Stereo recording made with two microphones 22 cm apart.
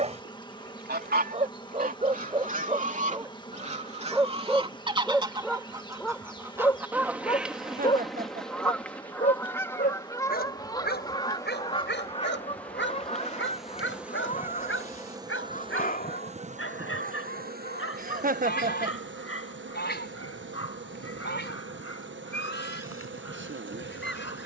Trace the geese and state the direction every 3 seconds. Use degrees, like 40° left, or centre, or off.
40° right, 20° right, centre, 20° left, 30° left, 40° left, 50° left, 60° left.